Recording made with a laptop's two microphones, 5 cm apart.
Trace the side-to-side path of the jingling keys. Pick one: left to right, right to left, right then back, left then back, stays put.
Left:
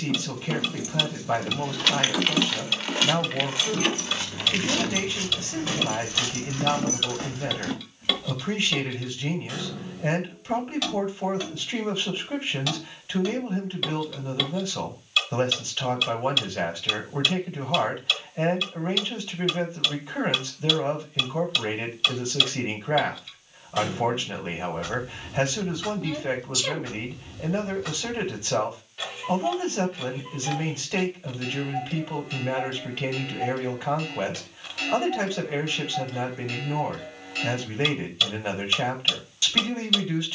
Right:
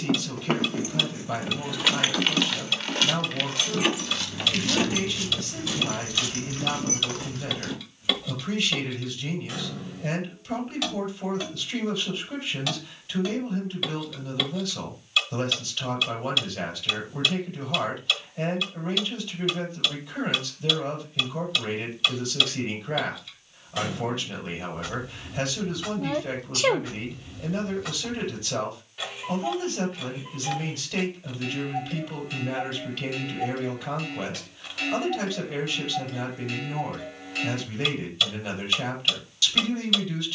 left then back.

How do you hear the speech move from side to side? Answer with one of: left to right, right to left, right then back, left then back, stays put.
stays put.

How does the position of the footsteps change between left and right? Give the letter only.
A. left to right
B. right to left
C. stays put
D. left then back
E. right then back
B.